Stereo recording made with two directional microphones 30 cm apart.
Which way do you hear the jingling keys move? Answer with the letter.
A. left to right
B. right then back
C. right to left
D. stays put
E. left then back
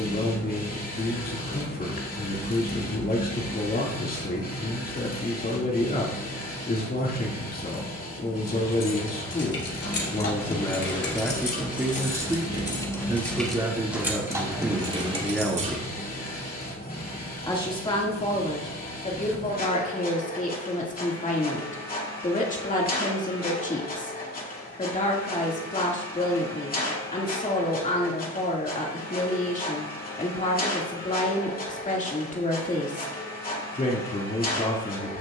A.